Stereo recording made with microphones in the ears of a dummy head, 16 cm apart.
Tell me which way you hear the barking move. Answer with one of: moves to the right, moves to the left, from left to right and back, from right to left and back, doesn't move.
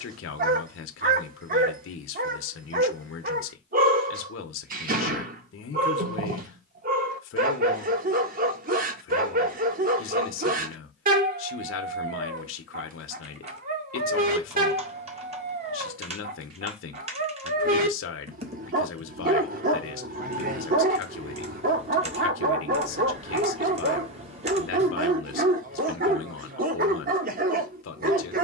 doesn't move.